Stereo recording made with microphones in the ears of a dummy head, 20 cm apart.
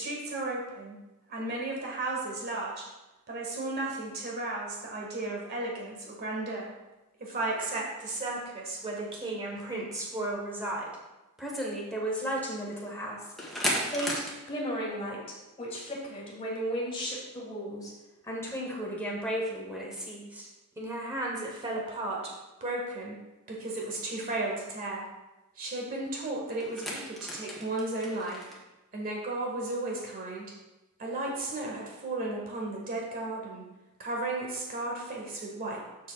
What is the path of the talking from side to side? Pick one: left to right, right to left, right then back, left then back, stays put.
left then back.